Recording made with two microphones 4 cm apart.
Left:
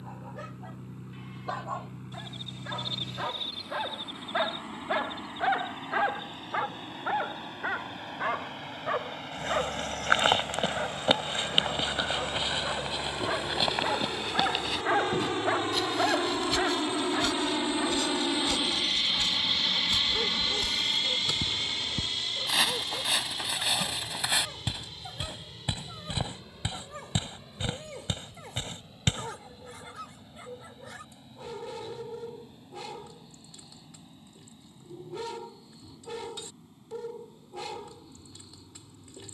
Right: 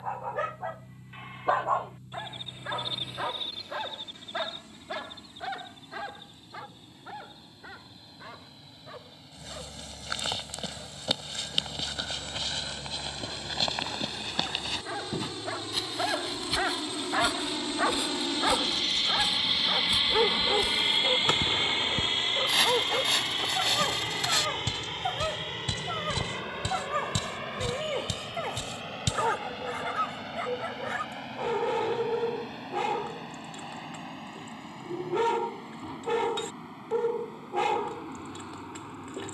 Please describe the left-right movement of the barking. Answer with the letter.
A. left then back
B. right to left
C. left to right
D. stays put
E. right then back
A.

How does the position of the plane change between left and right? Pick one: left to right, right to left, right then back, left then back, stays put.
left to right.